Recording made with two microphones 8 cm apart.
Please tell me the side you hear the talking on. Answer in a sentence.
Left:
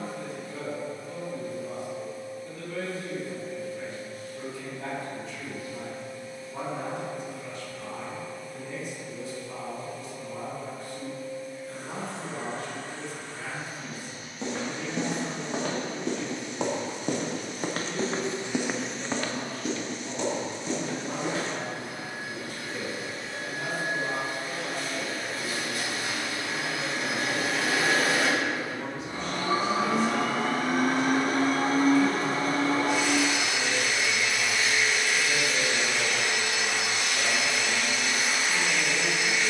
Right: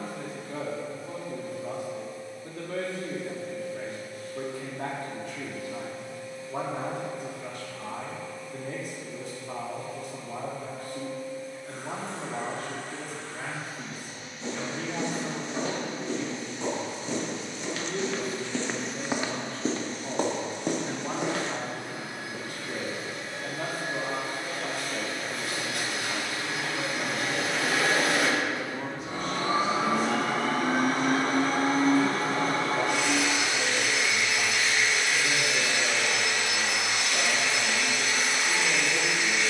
In this clip you hear the talking on the right.